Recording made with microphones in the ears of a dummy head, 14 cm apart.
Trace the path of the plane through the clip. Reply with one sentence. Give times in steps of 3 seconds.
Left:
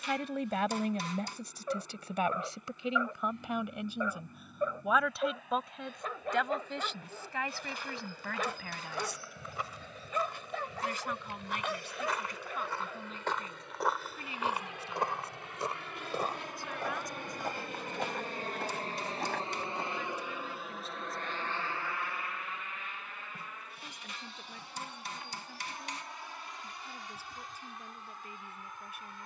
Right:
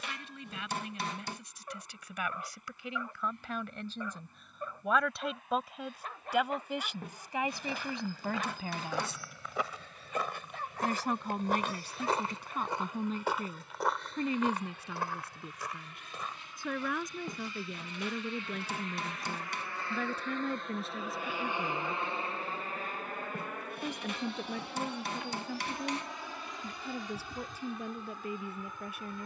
In this clip you hear the plane on the left from 0 s and on the right from 21 s.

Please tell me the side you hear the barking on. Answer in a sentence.
In this clip you hear the barking on the left.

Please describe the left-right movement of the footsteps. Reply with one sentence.
You can hear the footsteps go from the right side to the left.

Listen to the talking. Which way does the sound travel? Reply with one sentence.
In this clip you hear the talking move to the right.